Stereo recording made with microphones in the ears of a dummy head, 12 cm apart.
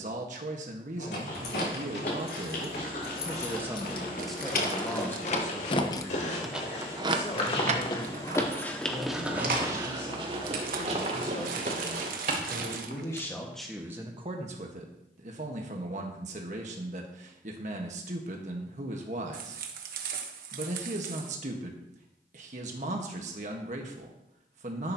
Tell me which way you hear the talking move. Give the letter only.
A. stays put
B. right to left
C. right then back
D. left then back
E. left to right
D.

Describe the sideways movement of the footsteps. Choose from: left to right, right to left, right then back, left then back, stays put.
left to right.